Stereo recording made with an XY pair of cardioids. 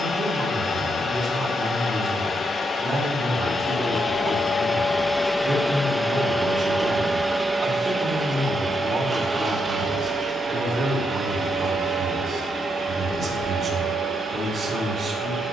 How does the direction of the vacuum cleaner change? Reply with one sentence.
In this clip you hear the vacuum cleaner travel towards the right.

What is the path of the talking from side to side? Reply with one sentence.
In this clip you hear the talking stay in one place.